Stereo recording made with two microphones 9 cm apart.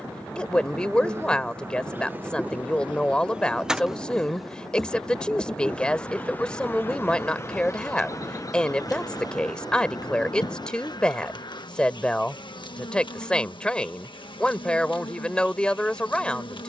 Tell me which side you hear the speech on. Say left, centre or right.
centre.